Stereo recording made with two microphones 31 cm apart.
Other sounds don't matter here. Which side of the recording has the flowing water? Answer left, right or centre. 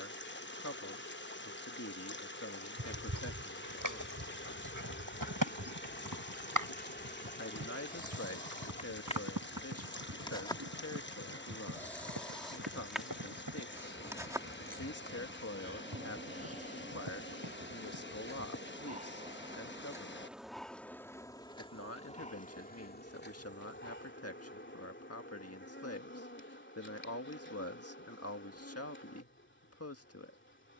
left.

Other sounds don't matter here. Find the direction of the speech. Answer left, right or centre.
left.